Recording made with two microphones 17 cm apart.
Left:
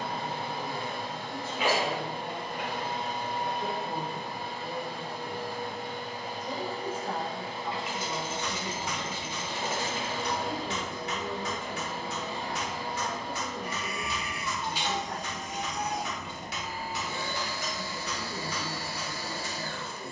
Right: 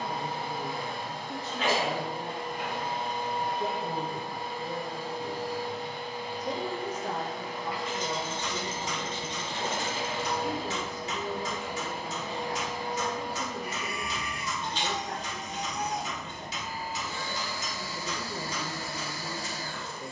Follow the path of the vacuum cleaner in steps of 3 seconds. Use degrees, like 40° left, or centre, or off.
60° left, 60° left, 30° left, centre, centre, 60° left, 60° left.